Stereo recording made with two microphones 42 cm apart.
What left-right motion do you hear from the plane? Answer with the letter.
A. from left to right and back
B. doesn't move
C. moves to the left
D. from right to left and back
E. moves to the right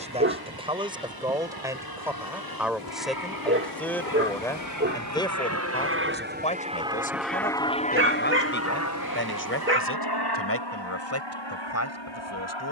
C.